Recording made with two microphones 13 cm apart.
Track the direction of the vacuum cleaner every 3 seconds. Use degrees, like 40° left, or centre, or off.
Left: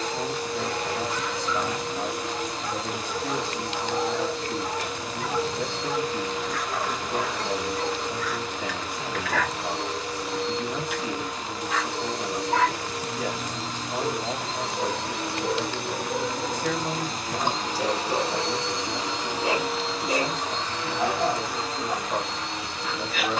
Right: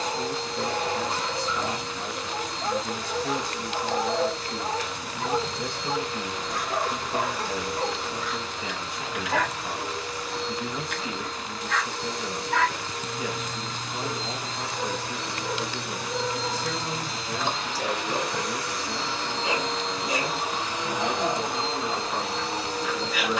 70° left, 70° left, 70° left, 70° left, 70° left, 50° left, 10° left, 30° right.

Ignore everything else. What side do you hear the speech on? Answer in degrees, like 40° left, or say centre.
70° left.